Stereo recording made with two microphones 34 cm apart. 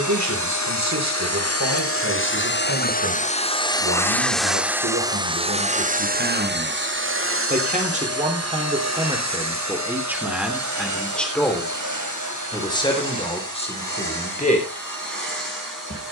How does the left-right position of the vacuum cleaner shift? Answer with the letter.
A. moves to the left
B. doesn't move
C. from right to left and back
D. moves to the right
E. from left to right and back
D.